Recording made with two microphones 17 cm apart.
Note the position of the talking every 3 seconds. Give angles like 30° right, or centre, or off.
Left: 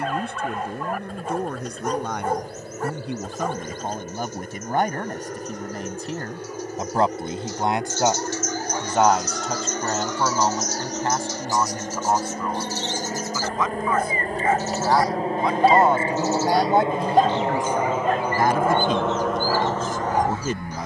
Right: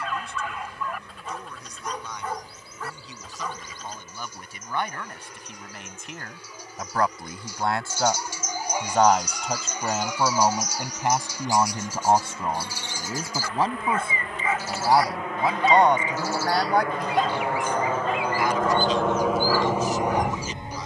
60° left, 50° left, 20° left, 10° right, 30° right, 20° left, 50° left.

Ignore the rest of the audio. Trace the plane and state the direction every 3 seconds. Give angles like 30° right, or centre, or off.
60° left, 60° left, 60° left, 50° left, 40° left, 30° left, 10° right.